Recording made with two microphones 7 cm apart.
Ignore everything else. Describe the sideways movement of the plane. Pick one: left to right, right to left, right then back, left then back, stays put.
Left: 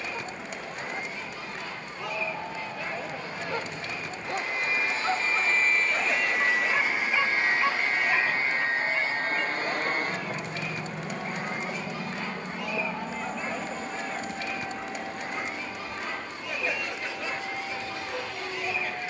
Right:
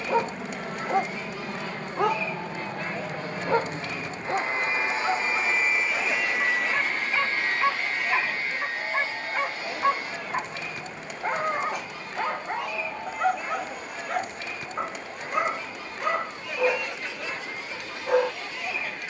right to left.